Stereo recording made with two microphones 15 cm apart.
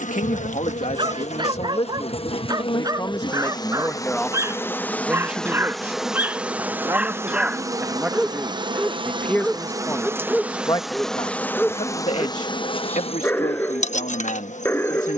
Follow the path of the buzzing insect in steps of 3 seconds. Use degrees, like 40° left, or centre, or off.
40° left, 10° left, 20° right, 10° right, 40° left.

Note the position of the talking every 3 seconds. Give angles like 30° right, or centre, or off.
40° left, centre, 10° right, 20° left, 50° left.